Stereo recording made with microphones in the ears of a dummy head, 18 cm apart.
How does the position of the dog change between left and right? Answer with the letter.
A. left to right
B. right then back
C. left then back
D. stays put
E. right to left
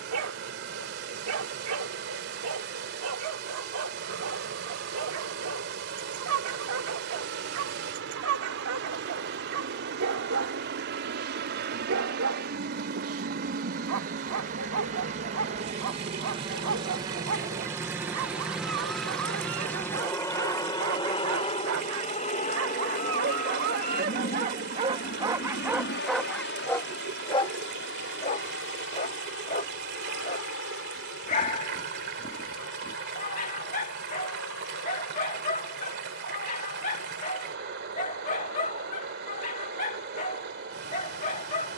E.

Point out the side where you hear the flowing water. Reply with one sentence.
You can hear the flowing water on the right.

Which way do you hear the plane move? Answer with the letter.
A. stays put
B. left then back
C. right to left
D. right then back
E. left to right
C.